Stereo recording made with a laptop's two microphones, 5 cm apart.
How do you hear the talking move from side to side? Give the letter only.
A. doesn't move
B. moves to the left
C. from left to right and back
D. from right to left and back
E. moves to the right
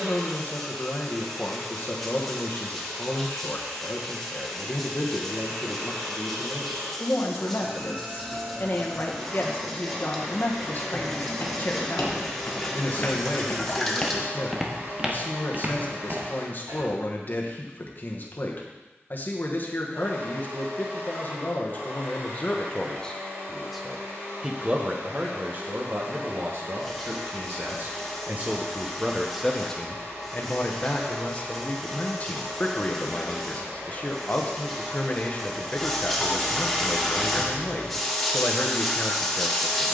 C.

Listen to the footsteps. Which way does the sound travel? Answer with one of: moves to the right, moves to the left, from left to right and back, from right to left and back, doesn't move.
moves to the right.